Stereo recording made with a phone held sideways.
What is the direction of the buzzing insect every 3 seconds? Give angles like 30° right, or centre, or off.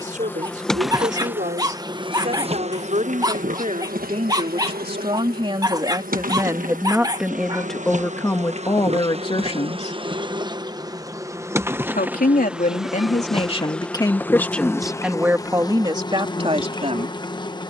10° right, 60° right, 50° right, 20° right, centre, 20° left.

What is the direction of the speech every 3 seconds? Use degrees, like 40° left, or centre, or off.
50° right, 40° right, centre, 40° left, 30° left, 30° right.